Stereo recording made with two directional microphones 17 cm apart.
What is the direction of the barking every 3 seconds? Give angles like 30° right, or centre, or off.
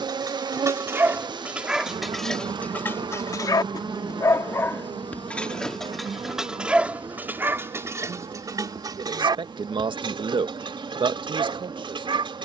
10° right, 10° left, 10° right, 30° right.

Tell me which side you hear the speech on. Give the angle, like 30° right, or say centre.
30° right.